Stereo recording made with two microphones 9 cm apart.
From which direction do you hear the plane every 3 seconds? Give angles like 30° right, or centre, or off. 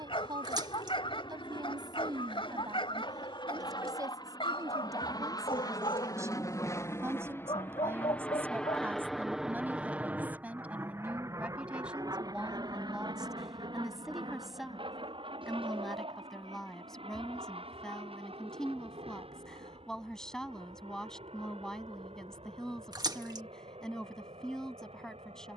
70° left, 50° left, 20° left, 20° right, 50° right, 60° right, 70° right, 70° right, 80° right.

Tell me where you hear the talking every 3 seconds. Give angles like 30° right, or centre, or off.
50° right, 40° right, 30° right, 20° right, 10° right, centre, 10° left, 10° left, 10° left.